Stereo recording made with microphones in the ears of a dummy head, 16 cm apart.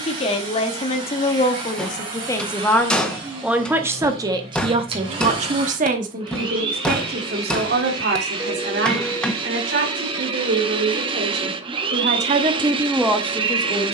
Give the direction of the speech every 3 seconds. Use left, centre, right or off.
left, right, right, right, centre.